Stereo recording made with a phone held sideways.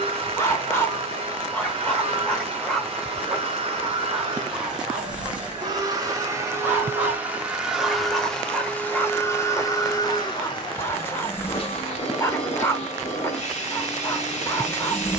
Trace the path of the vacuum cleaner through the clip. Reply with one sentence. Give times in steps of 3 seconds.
In this clip you hear the vacuum cleaner on the right from 0 s, in the centre from 6 s and on the left from 9 s.